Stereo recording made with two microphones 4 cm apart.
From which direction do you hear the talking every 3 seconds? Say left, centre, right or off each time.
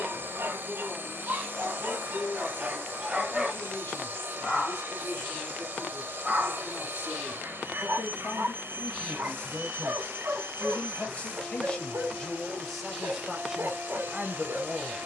left, left, left, left, centre.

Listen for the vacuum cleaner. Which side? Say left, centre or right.
right.